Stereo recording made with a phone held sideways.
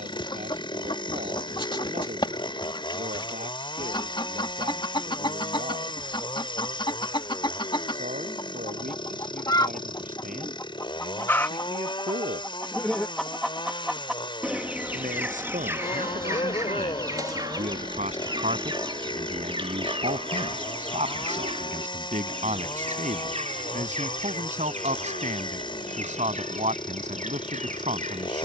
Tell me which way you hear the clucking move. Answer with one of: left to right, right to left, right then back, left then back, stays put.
left to right.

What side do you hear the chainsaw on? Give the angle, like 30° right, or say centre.
40° left.